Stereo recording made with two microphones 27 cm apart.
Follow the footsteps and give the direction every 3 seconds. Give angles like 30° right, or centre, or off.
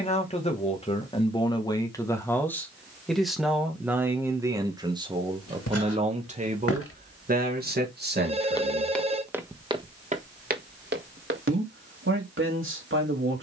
off, 70° left, 40° left, 30° right, off.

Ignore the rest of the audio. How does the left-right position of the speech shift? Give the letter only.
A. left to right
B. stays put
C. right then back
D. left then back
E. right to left
A.